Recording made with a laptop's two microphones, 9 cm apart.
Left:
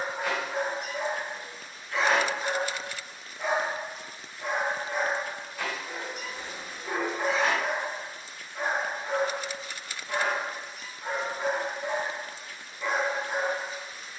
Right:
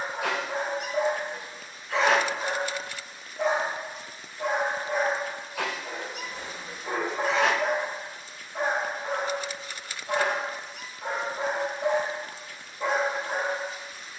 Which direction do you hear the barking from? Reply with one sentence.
You can hear the barking on the right.